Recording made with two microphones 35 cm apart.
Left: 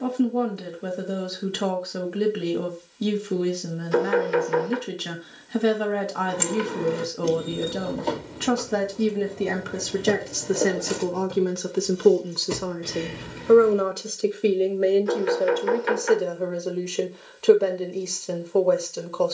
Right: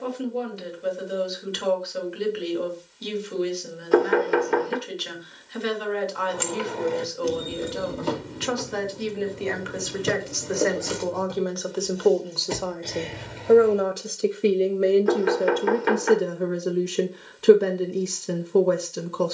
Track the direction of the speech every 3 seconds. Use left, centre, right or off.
left, left, left, left, centre, right, right.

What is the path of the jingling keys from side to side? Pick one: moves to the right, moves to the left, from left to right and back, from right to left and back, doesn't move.
from left to right and back.